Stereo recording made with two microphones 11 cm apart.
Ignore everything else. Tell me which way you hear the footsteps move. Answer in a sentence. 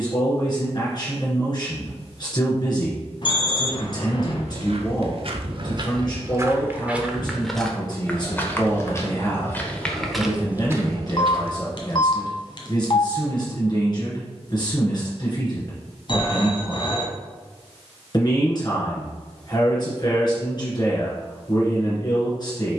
You can hear the footsteps move from right to left and back again.